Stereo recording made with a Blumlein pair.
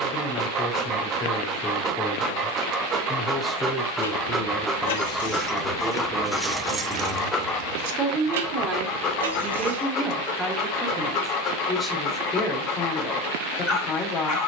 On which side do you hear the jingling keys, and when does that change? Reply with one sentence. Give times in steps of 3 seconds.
You can hear the jingling keys not at all from 0 s, on the left from 3 s, on the right from 6 s and not at all from 12 s.